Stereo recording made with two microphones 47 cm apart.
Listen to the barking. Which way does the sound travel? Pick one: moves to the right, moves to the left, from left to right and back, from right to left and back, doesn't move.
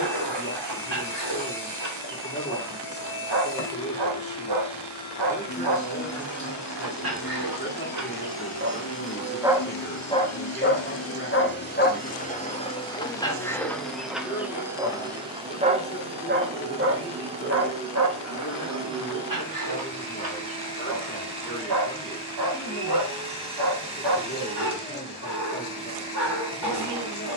from right to left and back.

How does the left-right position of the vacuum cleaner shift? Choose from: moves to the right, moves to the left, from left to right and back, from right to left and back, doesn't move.
moves to the right.